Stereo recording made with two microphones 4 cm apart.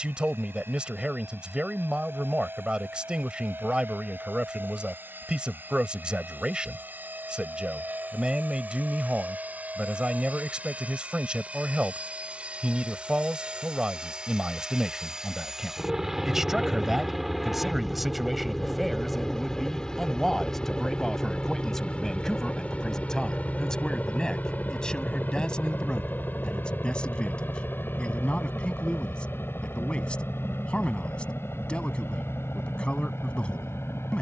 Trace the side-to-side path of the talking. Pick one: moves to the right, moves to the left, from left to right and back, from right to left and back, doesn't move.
moves to the left.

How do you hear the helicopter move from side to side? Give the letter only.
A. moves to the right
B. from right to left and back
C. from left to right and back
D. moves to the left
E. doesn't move
D.